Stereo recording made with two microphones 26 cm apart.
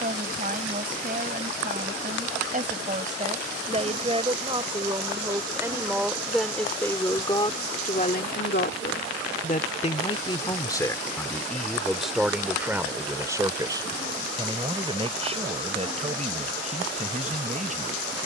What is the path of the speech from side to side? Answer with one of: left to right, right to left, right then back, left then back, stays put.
left then back.